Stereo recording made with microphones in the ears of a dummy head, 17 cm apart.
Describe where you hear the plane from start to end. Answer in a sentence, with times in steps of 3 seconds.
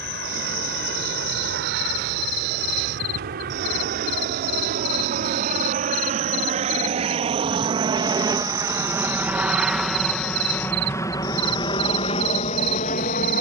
You can hear the plane on the right from 0 s, in the centre from 9 s and on the left from 12 s.